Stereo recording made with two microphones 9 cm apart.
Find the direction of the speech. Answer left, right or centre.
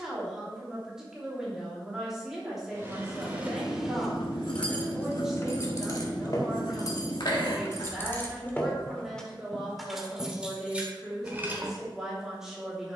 centre.